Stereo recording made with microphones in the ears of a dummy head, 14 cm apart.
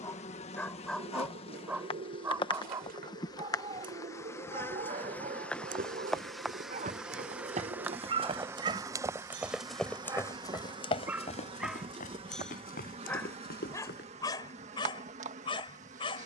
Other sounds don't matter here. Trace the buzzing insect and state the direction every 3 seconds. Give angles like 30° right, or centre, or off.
40° left, 20° left, 10° right, 30° right, 40° right, 50° right.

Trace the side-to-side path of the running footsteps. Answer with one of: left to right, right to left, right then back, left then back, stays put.
right to left.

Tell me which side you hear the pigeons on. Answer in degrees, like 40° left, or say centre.
70° right.